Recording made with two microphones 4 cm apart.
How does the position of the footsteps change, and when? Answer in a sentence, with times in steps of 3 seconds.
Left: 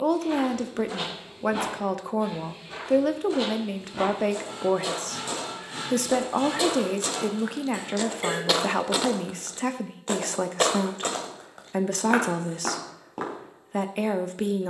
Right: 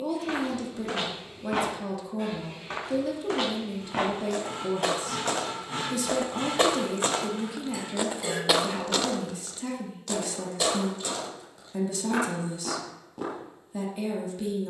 You can hear the footsteps on the right from 0 s and on the left from 9 s.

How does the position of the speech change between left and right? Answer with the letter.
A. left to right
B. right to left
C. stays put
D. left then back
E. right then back
C.